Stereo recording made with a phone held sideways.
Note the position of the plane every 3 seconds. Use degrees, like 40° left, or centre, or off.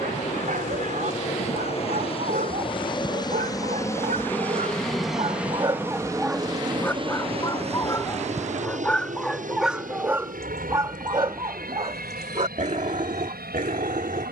50° left, 10° left, 40° right, 60° right, 70° right.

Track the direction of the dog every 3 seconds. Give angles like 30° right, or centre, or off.
70° right, 50° right, 10° left, 20° right, 60° right.